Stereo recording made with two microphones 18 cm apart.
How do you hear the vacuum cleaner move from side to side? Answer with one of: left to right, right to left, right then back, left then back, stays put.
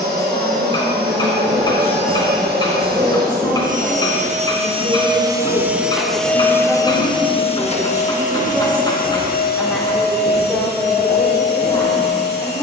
right to left.